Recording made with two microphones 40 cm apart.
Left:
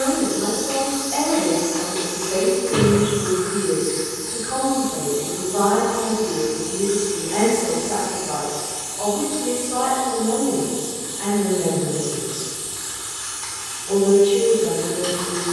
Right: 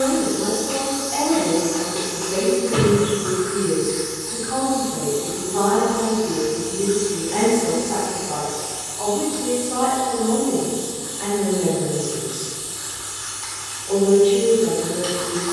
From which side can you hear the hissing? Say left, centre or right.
left.